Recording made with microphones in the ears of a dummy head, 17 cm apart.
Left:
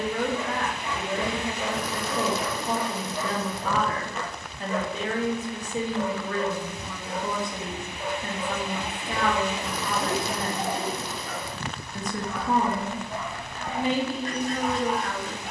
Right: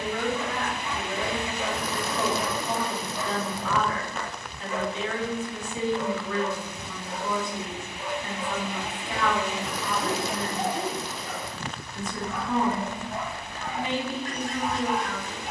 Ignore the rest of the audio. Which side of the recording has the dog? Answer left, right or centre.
left.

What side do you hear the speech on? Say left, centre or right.
left.